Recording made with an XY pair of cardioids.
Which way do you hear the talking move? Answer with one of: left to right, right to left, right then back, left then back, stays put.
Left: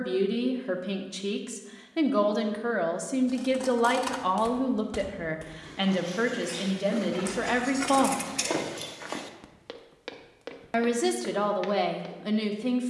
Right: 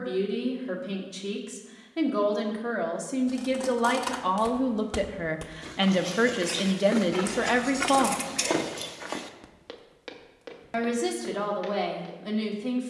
right then back.